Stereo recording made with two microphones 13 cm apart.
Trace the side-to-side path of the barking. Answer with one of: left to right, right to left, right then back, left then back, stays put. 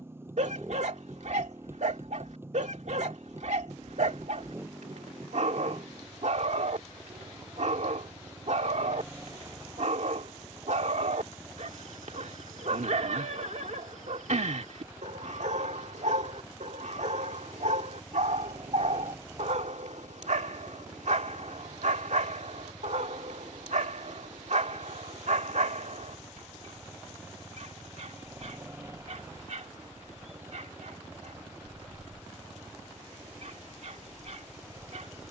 stays put.